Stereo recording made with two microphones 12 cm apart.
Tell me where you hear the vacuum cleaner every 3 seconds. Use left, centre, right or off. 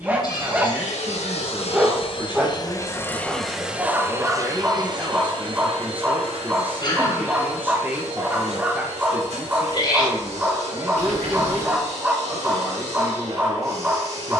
left, right, right, right, right.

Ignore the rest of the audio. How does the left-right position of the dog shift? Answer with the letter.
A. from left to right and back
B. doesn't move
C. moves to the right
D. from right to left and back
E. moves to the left
B.